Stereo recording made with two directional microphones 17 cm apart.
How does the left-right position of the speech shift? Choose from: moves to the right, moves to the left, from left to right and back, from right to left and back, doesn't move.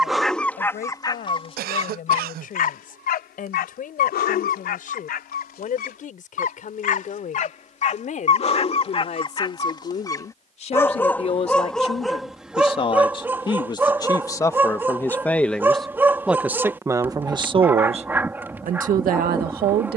moves to the right.